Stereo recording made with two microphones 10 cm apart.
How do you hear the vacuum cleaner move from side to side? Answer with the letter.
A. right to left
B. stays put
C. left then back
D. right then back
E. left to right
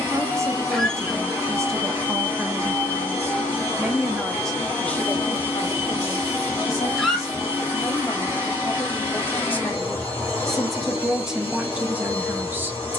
B.